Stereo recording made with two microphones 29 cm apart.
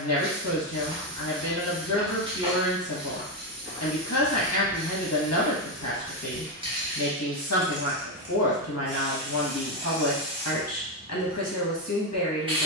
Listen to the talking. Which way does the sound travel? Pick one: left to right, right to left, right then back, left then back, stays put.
stays put.